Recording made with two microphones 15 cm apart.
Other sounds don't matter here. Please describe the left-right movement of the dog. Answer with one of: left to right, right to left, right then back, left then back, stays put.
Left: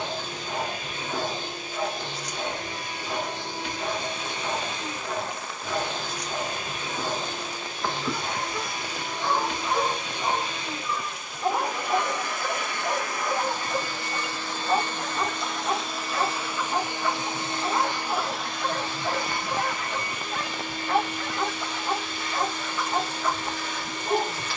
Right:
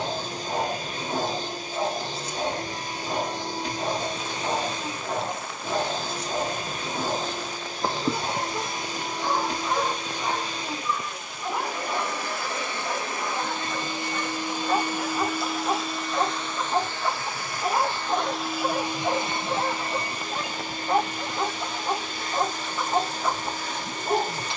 left then back.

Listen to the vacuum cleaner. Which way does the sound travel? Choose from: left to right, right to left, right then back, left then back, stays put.
left then back.